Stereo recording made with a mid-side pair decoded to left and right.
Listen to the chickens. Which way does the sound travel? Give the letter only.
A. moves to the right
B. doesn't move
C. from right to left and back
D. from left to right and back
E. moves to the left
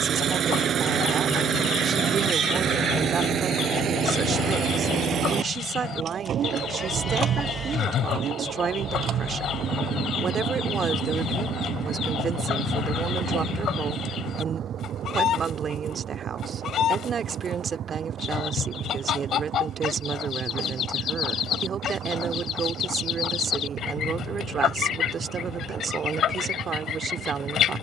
B.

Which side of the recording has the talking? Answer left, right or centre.
right.